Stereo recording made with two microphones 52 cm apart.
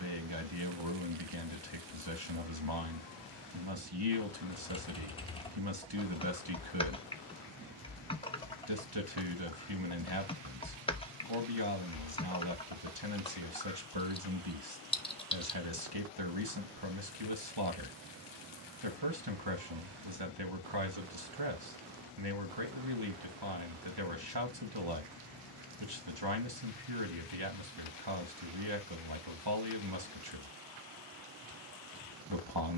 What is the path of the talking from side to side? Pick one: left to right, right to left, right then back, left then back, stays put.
stays put.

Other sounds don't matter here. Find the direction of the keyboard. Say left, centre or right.
centre.